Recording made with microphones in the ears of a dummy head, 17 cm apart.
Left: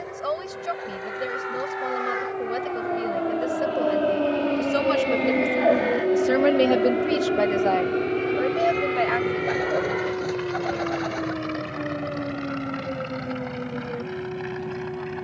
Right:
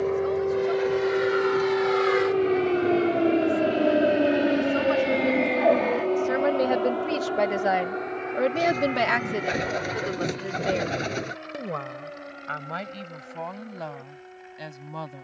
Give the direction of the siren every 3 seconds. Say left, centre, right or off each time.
right, centre, left, left, left.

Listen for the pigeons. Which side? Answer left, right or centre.
right.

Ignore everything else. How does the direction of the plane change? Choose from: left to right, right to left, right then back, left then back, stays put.
right to left.